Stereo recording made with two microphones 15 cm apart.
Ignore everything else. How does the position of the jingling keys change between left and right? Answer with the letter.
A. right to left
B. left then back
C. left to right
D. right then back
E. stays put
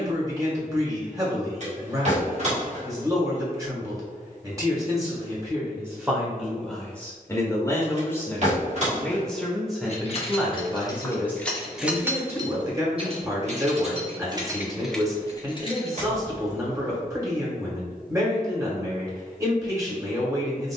D.